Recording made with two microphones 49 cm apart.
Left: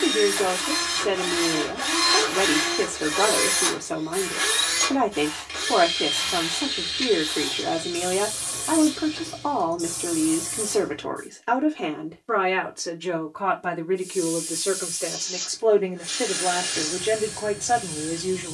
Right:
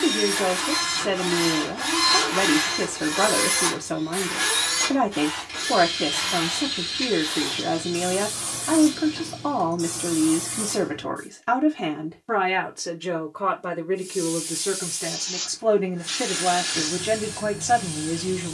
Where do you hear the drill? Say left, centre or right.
right.